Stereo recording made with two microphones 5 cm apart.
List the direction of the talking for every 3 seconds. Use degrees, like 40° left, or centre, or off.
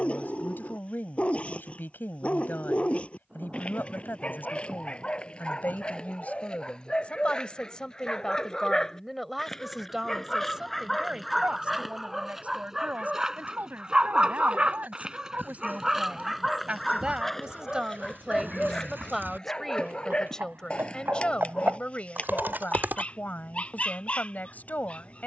40° left, 40° left, 20° left, 20° right, 40° right, 30° right, centre, 30° left, 30° left.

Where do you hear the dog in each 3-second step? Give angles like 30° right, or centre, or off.
20° left, 20° left, 10° left, centre, 20° right, centre, 10° left, 20° left, 20° left.